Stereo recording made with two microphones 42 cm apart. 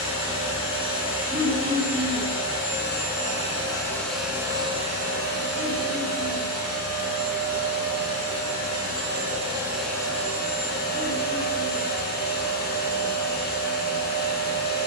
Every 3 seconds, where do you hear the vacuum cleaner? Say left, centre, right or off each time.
left, centre, right, centre, left.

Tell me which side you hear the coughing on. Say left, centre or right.
centre.